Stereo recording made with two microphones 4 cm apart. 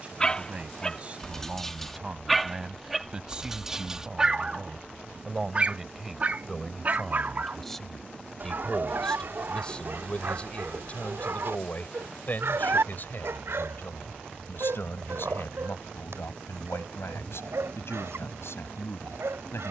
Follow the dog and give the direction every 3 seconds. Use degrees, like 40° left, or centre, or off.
10° left, 20° right, 50° right, 60° right, 70° right, 80° right, 80° right.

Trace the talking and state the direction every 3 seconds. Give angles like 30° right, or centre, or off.
30° right, 20° right, centre, 30° left, 50° left, 70° left, 70° left.